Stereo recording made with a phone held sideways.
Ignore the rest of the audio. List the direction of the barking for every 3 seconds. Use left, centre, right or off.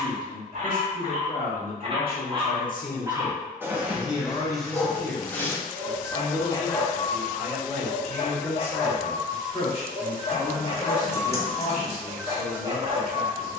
right, centre, left, left, right.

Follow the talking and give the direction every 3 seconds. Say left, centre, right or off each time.
left, left, centre, left, left.